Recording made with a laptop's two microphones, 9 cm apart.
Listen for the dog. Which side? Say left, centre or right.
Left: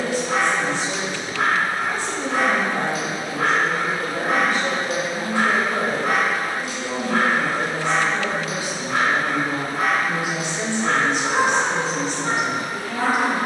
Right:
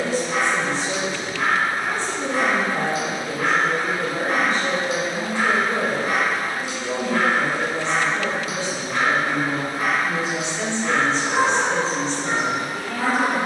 left.